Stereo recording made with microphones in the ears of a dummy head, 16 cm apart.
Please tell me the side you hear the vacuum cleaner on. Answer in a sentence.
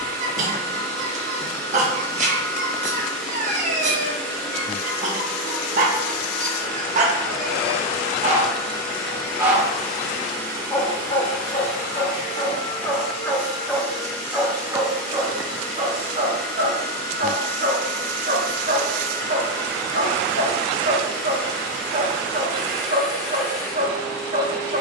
In this clip you hear the vacuum cleaner in the centre.